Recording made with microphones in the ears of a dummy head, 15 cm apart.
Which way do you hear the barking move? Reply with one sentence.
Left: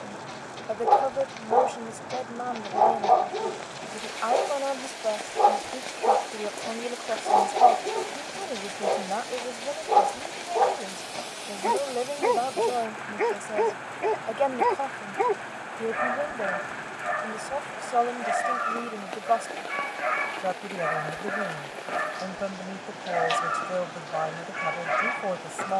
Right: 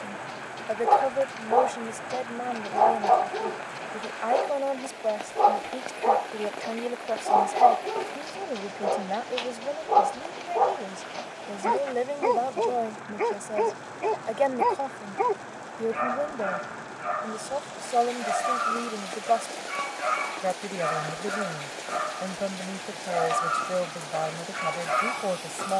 You can hear the barking stay put.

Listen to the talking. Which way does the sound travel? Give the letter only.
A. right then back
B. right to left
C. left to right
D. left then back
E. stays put
E.